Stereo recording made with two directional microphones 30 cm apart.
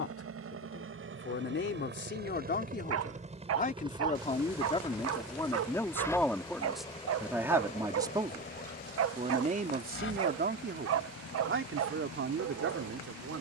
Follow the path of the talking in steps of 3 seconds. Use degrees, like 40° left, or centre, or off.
40° left, 20° left, centre, 30° right, 50° right.